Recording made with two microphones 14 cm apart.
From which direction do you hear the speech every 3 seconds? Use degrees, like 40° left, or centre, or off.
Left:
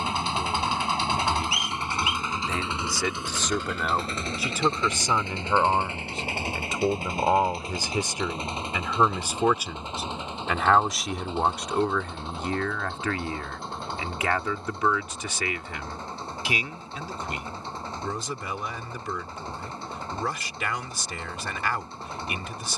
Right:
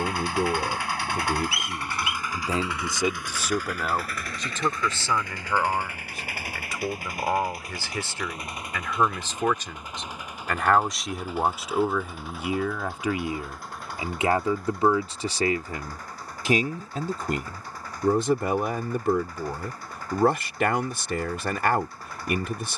50° right, 10° left, 20° left, centre, 20° right, 40° right, 60° right, 60° right.